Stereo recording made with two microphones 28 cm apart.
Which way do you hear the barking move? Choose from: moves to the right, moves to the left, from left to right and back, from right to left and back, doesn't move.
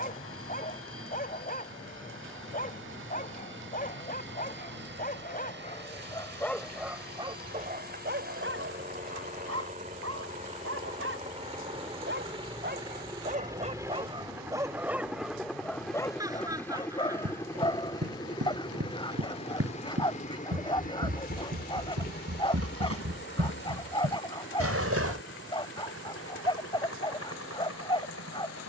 from left to right and back.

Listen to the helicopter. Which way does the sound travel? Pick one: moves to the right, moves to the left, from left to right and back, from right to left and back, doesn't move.
moves to the left.